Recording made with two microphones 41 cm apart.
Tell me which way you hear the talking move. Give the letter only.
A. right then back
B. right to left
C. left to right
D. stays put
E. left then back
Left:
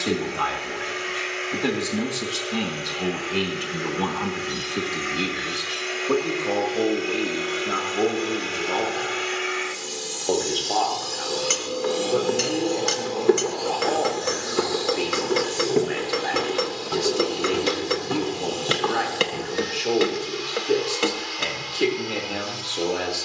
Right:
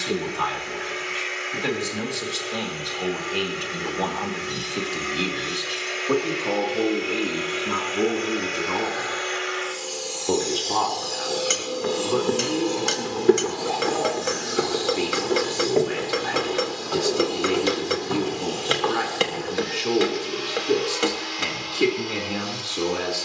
C.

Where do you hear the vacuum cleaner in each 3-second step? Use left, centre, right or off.
left, left, left, left, right, right, right, right.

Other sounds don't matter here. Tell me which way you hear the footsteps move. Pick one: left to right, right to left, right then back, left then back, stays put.
right to left.